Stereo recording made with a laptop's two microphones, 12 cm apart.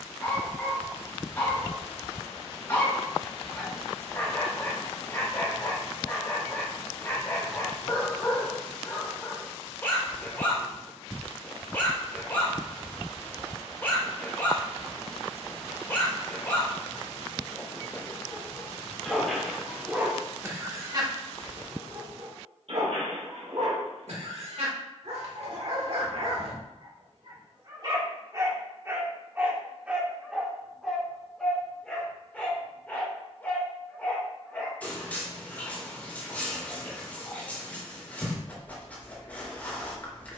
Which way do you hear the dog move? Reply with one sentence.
In this clip you hear the dog move from left to right and back again.